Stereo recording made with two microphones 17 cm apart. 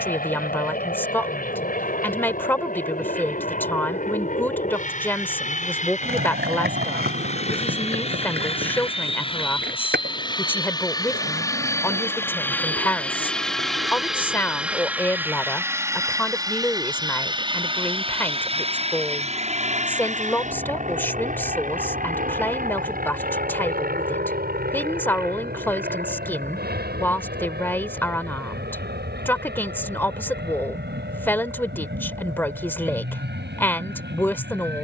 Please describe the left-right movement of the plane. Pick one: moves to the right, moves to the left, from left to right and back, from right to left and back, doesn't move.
moves to the right.